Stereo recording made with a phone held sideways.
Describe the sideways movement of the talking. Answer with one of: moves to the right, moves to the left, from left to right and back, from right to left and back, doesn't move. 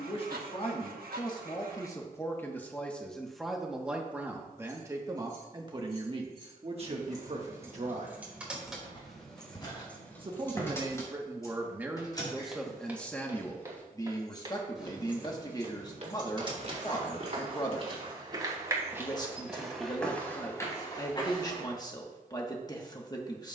from left to right and back.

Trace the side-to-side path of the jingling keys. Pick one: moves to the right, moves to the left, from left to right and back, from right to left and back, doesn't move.
from right to left and back.